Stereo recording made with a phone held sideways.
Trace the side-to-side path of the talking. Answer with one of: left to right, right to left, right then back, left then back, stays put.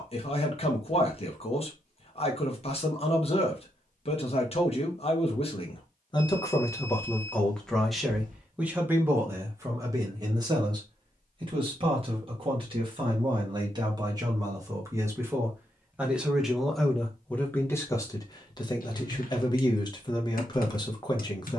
right then back.